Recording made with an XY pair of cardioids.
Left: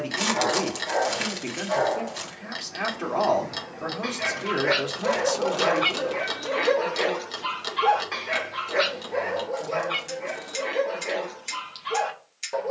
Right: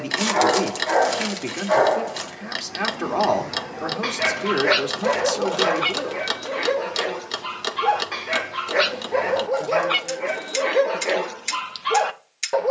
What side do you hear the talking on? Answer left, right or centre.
right.